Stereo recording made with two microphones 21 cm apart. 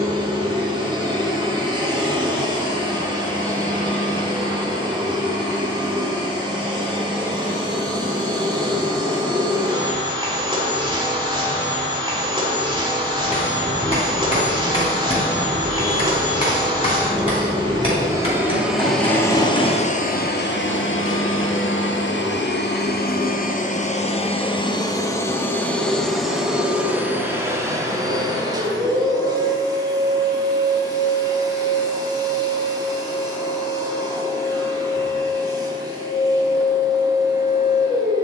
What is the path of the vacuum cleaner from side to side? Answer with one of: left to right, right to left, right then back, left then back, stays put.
left then back.